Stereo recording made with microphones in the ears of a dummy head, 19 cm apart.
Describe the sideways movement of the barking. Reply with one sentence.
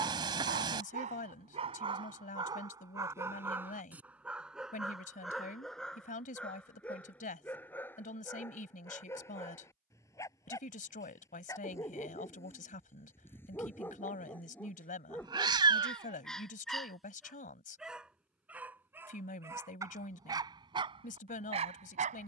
In this clip you hear the barking move from right to left and back again.